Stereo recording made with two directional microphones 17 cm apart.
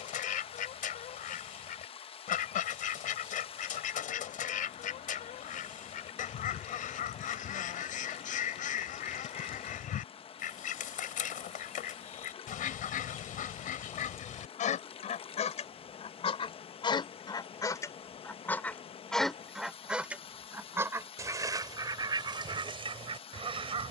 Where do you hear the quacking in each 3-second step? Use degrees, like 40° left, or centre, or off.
60° left, 60° left, 60° left, 60° left, 50° left, 30° left, centre, 30° right.